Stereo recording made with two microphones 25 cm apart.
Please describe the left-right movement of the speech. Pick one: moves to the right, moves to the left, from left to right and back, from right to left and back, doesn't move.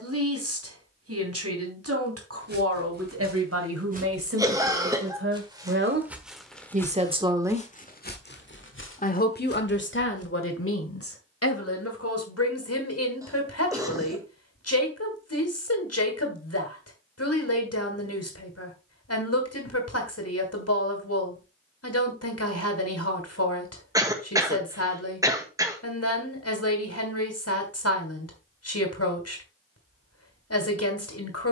moves to the left.